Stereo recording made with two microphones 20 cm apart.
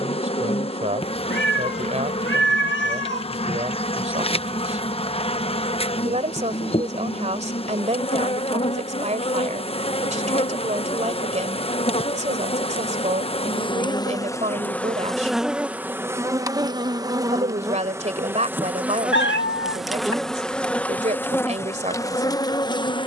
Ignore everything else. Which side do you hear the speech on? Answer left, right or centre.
right.